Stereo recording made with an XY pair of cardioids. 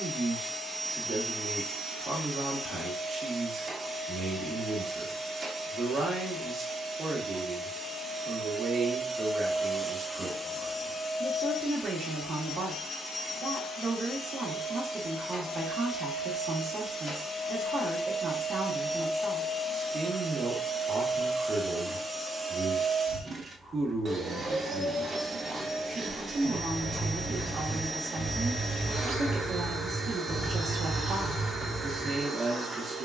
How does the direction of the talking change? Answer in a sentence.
In this clip you hear the talking stay in one place.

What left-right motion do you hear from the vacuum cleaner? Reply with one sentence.
You can hear the vacuum cleaner go left and come back.